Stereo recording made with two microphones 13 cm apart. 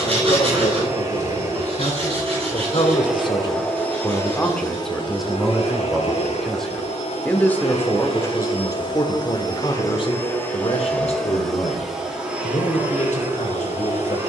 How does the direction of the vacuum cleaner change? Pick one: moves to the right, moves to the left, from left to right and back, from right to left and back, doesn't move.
from right to left and back.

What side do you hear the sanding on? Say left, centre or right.
right.